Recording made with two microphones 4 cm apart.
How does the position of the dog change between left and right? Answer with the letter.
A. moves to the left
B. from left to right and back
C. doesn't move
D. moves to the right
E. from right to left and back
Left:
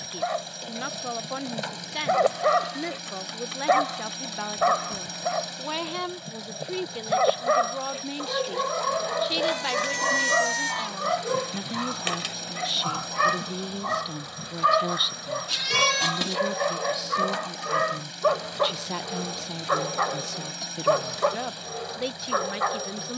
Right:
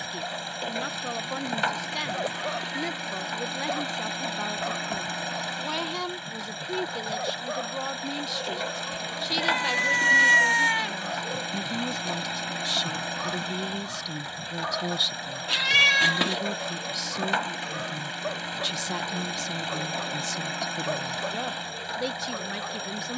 C.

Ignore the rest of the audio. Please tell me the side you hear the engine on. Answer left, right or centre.
right.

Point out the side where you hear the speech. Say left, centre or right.
centre.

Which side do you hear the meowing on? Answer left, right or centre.
right.